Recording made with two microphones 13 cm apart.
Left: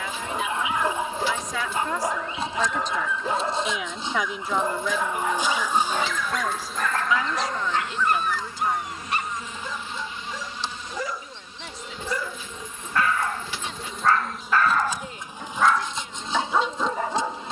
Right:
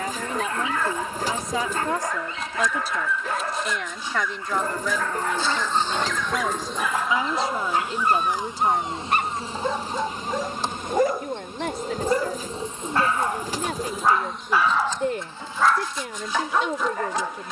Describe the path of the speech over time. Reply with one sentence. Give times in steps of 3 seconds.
You can hear the speech on the right from 0 s, in the centre from 3 s and on the right from 6 s.